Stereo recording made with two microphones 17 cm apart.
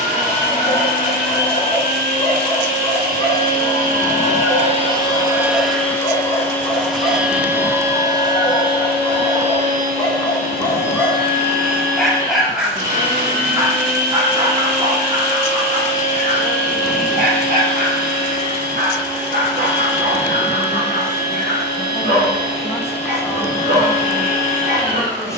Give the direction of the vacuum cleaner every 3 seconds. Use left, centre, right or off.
right, right, centre, right, right, right, right, right, right.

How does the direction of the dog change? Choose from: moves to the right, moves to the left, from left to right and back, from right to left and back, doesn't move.
moves to the right.